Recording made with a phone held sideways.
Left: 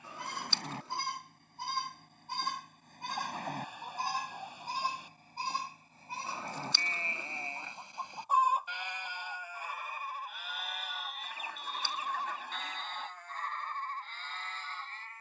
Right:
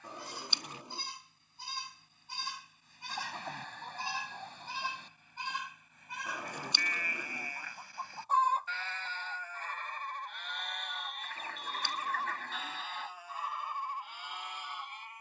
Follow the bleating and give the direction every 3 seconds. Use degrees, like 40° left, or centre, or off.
60° left, 40° left, 20° left, 10° left, 10° right.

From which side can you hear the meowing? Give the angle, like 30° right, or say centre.
20° right.